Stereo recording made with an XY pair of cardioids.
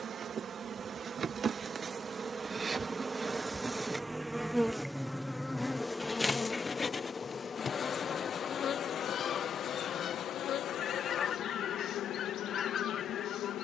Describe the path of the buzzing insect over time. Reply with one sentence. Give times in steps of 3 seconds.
In this clip you hear the buzzing insect on the right from 0 s, in the centre from 3 s and on the left from 6 s.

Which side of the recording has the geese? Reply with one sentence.
You can hear the geese on the left.